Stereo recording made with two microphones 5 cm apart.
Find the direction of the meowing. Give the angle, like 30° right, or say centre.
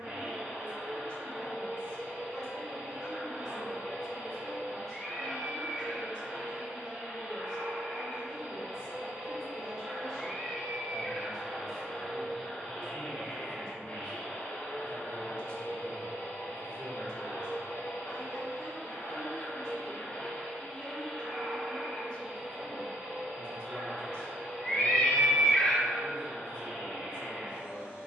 20° left.